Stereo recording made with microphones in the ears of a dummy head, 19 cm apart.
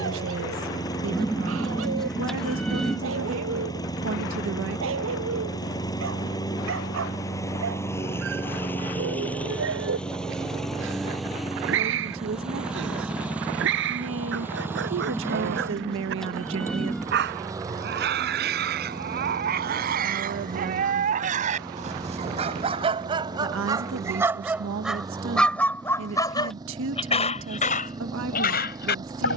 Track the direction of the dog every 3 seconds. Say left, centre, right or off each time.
right, right, right, right, right, right, right, right, centre, left.